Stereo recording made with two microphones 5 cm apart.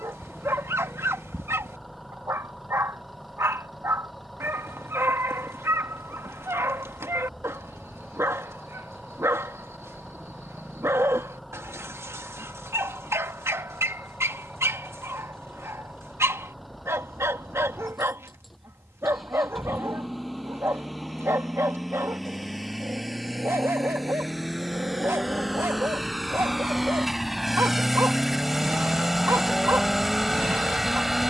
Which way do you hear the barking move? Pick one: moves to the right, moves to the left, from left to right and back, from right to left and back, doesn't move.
doesn't move.